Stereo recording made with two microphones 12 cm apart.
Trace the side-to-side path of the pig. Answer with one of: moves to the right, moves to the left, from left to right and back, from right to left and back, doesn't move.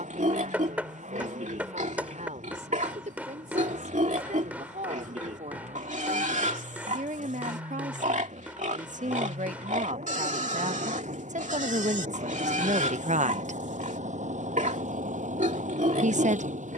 doesn't move.